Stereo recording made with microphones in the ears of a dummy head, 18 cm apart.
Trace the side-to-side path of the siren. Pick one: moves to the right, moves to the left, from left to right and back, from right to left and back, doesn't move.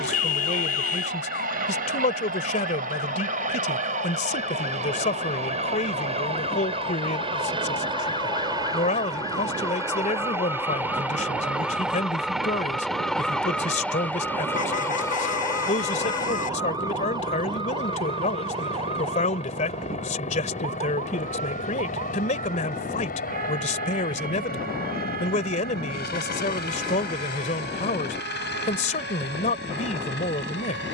moves to the right.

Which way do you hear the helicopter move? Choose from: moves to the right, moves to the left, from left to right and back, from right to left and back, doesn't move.
moves to the left.